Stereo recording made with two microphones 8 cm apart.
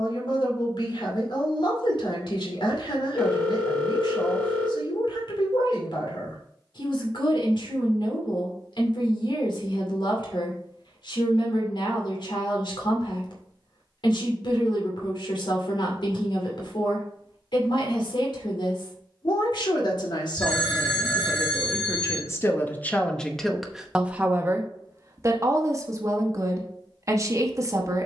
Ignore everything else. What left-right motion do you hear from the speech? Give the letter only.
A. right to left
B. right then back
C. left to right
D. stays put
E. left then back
C.